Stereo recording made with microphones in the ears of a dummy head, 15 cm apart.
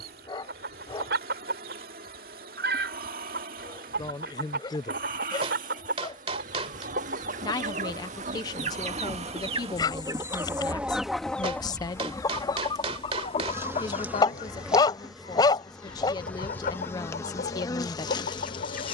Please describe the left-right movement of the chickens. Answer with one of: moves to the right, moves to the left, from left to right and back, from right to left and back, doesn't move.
moves to the left.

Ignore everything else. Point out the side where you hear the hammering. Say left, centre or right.
right.